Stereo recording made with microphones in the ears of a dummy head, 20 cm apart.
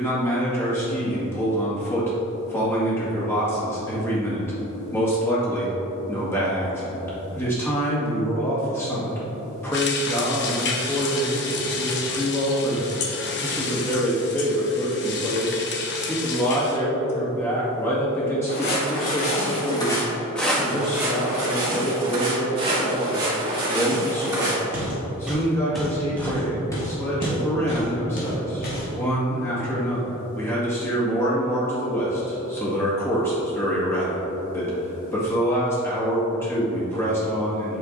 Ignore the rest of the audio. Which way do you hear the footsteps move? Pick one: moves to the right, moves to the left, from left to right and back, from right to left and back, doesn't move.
from left to right and back.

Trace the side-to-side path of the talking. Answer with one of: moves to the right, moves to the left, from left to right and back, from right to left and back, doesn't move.
doesn't move.